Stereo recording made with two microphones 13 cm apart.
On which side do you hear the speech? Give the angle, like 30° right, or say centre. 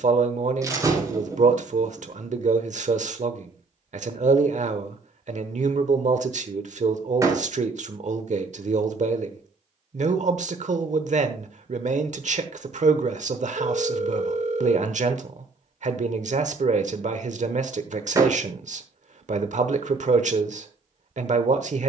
70° right.